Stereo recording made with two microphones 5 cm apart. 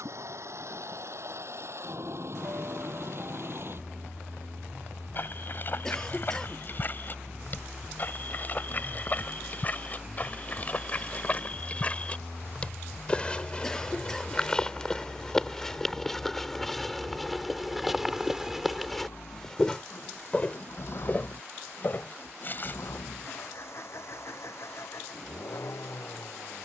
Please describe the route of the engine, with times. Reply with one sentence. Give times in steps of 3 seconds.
You can hear the engine on the right from 0 s, in the centre from 9 s and on the left from 12 s.